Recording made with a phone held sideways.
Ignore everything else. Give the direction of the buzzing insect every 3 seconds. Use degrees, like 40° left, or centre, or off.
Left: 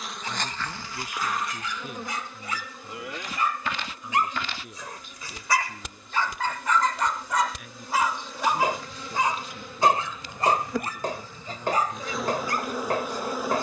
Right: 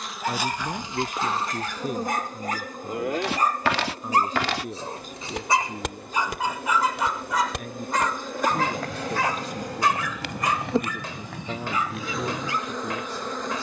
30° right, 60° right, 50° right, 30° right, 10° left.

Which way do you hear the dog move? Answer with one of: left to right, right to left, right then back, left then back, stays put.
right to left.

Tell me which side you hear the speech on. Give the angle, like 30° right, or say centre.
50° right.